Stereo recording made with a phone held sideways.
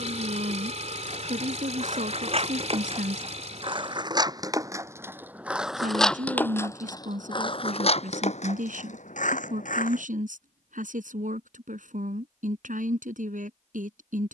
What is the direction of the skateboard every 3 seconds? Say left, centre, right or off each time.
right, right, left, left, off.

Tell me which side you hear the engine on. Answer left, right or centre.
right.